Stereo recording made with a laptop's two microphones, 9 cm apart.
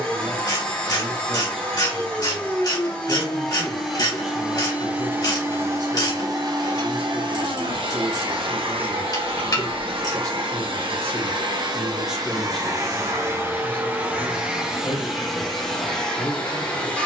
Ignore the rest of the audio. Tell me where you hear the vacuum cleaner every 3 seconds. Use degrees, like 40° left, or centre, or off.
20° left, 10° right, 60° right, 70° right, 30° right, 10° left.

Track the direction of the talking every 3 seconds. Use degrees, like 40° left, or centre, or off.
30° left, 10° right, 70° right, 30° right, 10° left, 30° left.